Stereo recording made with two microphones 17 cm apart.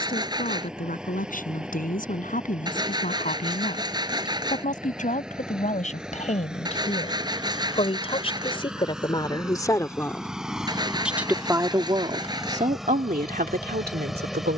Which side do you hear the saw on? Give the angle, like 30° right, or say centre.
20° right.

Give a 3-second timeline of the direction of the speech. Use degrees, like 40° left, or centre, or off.
50° left, 50° left, 40° left, centre, 60° right.